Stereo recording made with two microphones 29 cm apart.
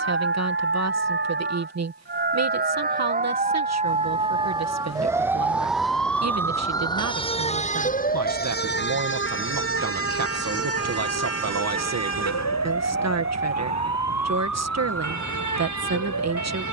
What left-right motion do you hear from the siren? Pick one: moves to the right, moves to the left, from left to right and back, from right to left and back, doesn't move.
moves to the left.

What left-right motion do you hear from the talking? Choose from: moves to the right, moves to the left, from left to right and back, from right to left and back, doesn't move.
doesn't move.